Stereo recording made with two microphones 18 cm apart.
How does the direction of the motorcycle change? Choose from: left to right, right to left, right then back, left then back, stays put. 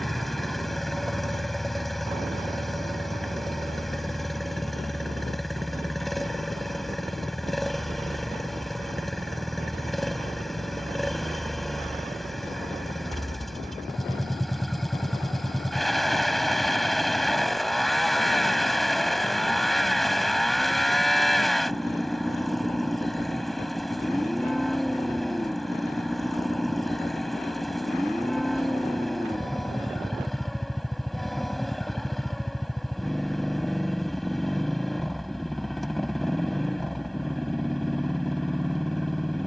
stays put.